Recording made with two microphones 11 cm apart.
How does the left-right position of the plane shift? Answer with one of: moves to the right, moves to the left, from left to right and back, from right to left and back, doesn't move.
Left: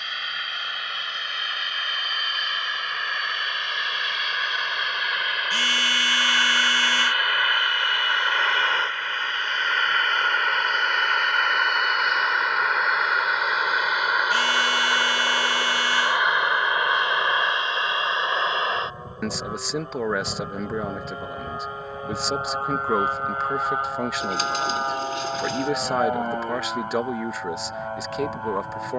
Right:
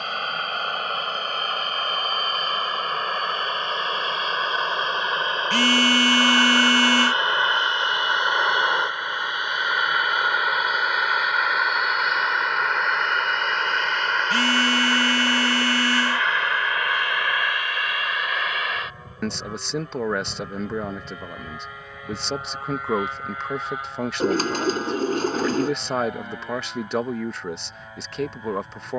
moves to the left.